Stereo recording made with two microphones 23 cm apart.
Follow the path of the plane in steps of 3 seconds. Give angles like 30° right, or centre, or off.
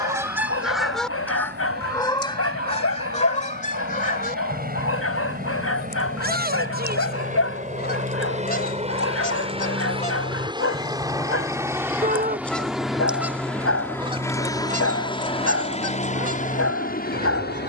50° right, 40° right, 40° right, 20° right, centre, 30° left.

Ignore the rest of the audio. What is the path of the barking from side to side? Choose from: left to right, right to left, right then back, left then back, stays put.
stays put.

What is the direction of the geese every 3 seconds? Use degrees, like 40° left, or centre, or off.
10° left, 40° left, 50° left, 30° left, 10° right, 40° right.